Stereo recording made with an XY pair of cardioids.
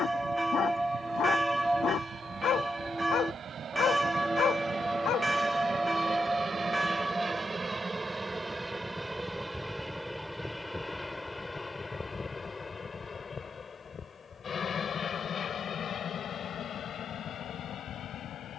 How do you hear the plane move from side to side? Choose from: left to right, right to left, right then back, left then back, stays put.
right to left.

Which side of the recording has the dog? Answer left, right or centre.
left.